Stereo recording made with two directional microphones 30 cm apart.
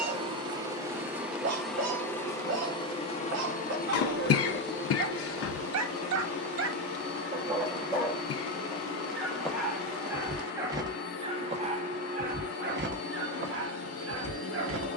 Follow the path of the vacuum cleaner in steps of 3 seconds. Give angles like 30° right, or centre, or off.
centre, 40° left, 50° left, 50° left, 50° left.